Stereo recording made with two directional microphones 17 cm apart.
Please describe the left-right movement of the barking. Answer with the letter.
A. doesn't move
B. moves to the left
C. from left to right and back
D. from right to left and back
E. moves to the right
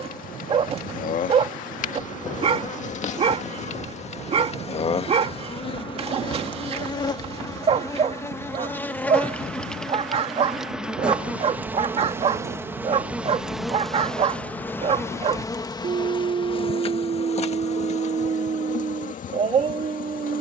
A.